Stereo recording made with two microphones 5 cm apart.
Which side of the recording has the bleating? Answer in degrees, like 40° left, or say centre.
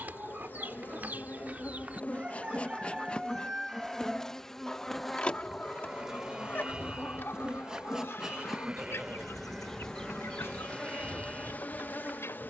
20° right.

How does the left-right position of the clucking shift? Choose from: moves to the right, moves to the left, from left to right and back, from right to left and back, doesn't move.
moves to the left.